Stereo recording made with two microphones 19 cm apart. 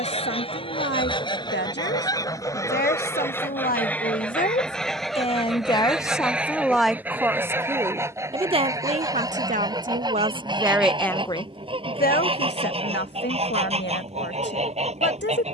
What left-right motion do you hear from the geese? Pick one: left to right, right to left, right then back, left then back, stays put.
left to right.